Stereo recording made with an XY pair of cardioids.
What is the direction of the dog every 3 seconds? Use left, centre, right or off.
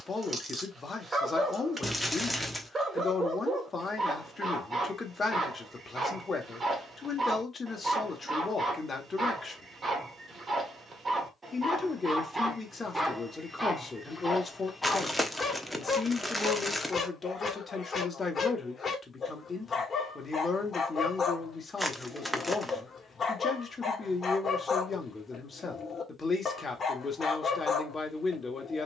right, right, right, right, centre, left, left, left, left, left.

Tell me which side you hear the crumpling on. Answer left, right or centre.
centre.